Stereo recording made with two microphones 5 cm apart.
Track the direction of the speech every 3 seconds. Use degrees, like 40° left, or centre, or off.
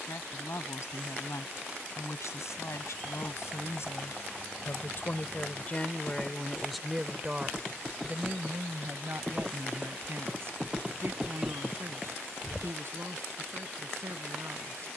70° left, 50° left, 20° right, 60° right, 70° right.